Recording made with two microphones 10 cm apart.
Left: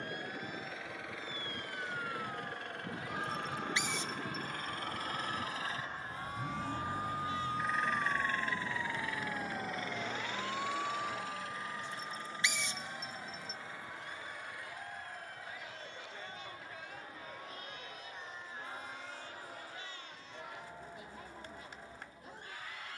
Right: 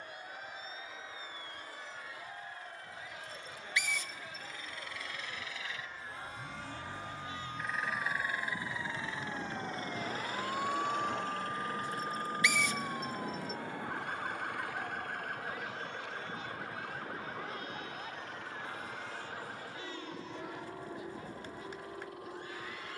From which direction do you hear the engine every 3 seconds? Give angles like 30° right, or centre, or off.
70° left, 50° left, centre, 40° right, 60° right, 60° right, 70° right, 70° right.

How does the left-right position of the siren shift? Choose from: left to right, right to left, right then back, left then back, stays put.
left to right.